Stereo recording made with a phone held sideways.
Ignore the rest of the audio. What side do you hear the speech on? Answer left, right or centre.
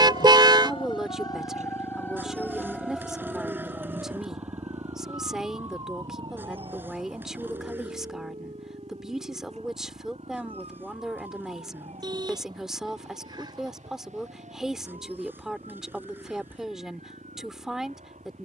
centre.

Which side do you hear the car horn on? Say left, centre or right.
right.